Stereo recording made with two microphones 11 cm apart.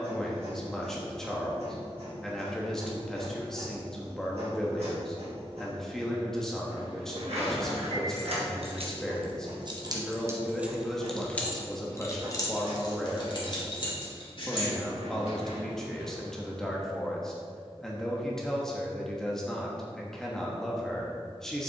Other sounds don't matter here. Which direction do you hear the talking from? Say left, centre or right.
centre.